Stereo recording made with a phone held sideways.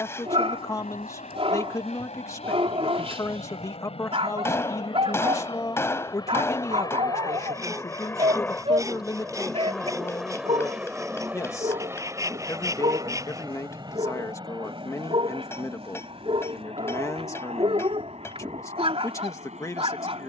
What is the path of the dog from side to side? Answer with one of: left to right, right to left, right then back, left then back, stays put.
stays put.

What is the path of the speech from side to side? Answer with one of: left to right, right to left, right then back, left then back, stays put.
stays put.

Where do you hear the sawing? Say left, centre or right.
right.